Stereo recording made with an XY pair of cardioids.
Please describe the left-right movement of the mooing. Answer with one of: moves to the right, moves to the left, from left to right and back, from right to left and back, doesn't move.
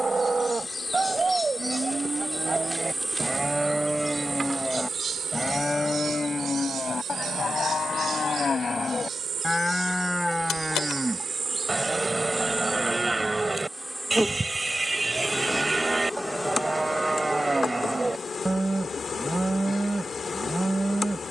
from right to left and back.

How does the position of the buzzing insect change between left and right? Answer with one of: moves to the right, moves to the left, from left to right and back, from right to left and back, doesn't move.
from left to right and back.